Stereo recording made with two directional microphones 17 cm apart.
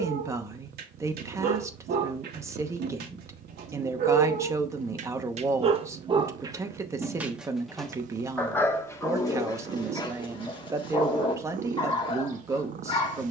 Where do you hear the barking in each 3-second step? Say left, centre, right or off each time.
right, right, centre, left, left.